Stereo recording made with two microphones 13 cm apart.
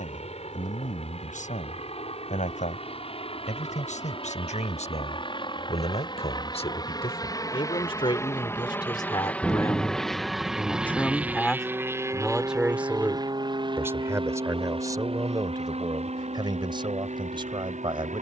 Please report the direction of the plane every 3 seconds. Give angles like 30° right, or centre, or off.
60° left, 50° left, 30° left, centre, 30° right, 50° right.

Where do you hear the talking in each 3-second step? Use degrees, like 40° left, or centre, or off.
80° left, 70° left, 50° left, 20° left, 20° right, 30° right.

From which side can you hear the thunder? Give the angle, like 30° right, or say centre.
centre.